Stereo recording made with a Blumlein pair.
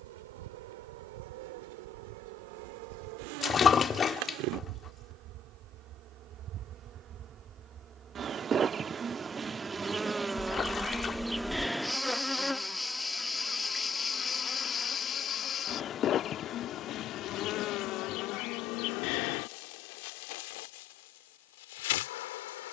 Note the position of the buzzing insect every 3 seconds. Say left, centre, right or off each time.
right, right, right, centre, centre, left, left, left.